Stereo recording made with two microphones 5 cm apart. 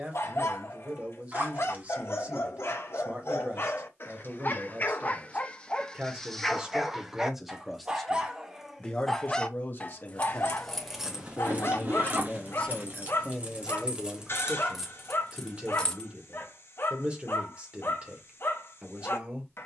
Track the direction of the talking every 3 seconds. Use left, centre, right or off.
right, right, centre, left, centre, right, right.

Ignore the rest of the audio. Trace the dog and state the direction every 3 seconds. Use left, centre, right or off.
left, left, centre, left, left, left, left.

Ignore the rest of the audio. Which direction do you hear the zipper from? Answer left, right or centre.
right.